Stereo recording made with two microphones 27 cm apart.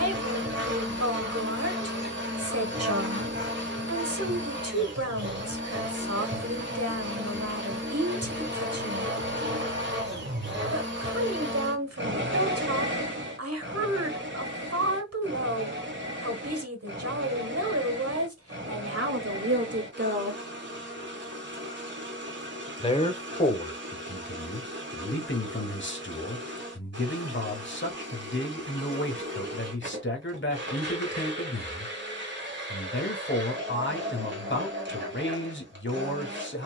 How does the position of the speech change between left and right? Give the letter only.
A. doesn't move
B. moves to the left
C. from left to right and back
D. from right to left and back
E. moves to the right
B.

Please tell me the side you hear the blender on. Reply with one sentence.
In this clip you hear the blender on the right.